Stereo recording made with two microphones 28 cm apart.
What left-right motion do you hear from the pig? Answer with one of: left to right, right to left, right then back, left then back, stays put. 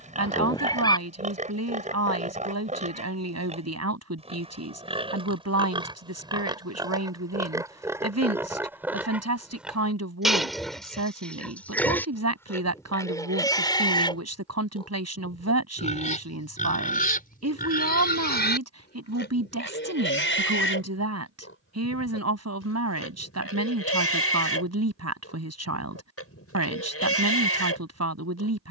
right to left.